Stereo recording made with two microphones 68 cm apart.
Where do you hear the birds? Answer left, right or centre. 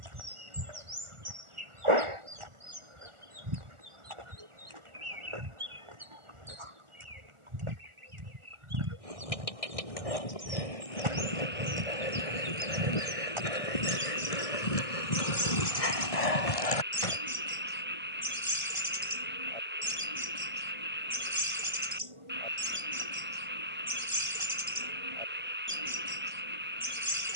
right.